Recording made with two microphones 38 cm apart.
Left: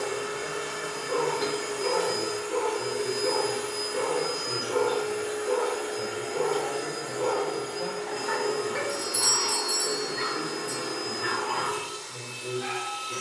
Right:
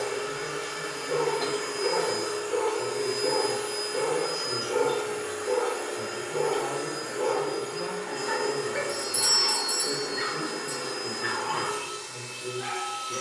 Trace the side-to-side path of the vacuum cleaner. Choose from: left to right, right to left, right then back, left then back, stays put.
left to right.